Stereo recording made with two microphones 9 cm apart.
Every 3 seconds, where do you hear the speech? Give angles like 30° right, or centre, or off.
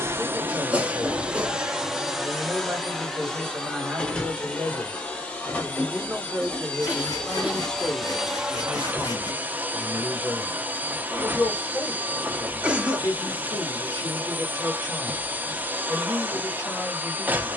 20° right, 20° right, 10° left, 30° left, 30° left, 30° left.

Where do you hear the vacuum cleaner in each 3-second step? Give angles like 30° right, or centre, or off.
10° right, 10° left, 10° left, 20° right, 20° right, 20° right.